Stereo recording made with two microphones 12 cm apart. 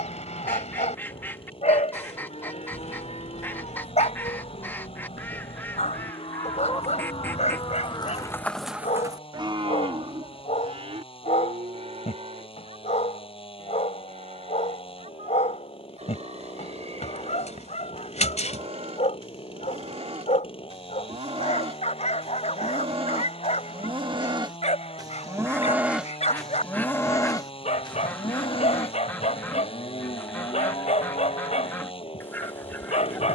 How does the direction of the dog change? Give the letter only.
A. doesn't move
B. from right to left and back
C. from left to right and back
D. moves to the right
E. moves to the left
A.